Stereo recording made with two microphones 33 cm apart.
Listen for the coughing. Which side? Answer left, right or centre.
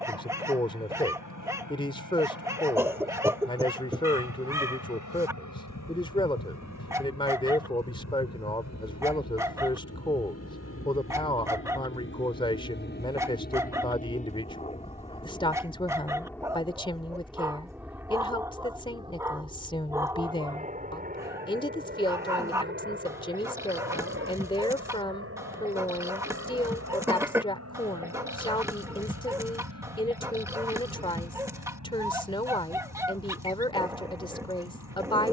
centre.